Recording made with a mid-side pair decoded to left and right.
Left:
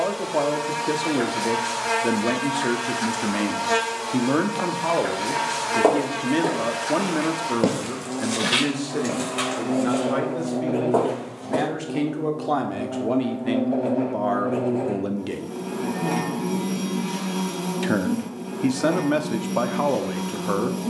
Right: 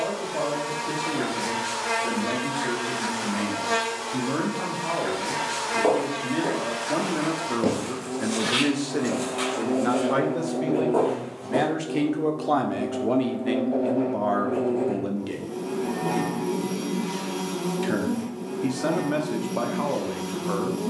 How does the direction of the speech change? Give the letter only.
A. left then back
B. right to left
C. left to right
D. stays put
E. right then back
E.